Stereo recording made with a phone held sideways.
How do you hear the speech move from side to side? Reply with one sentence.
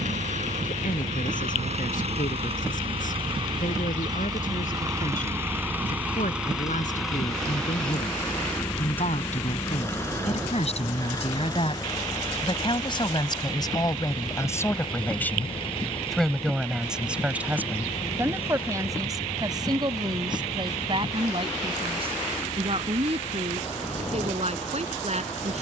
In this clip you hear the speech move from left to right.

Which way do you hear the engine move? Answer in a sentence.
You can hear the engine go from the right side to the left.